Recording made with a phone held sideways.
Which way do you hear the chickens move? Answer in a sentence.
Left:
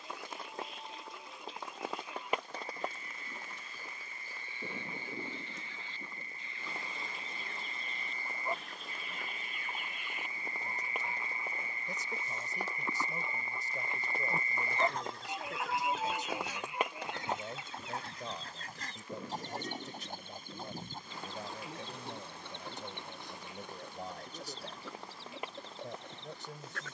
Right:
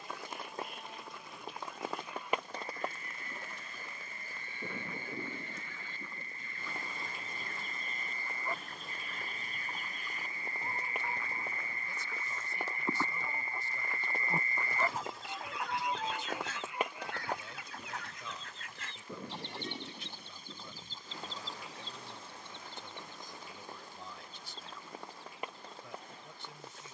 In this clip you hear the chickens move from right to left.